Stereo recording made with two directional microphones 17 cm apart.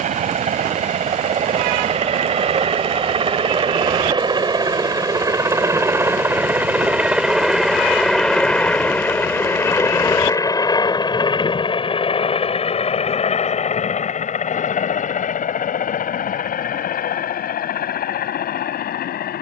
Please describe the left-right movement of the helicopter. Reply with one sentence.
You can hear the helicopter go from the right side to the left.